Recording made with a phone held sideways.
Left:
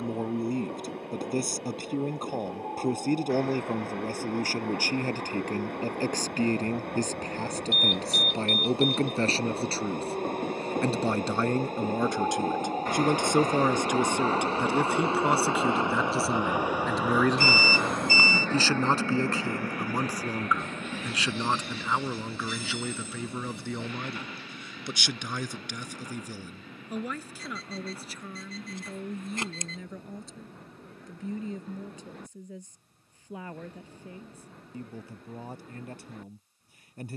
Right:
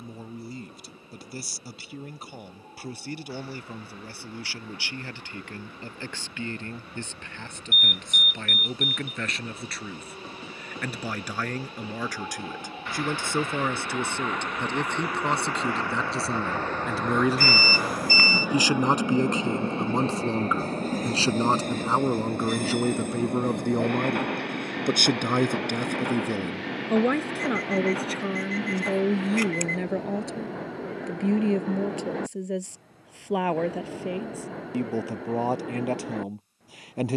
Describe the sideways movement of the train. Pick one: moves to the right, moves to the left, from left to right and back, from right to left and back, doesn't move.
moves to the right.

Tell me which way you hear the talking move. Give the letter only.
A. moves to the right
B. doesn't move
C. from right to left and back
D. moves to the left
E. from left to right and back
A.